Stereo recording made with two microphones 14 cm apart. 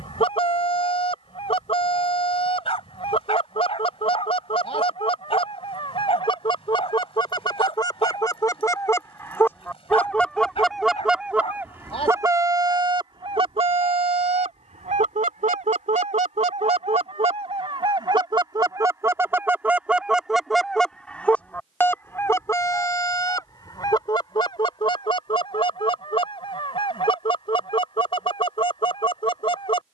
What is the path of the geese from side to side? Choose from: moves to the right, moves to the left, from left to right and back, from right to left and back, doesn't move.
from left to right and back.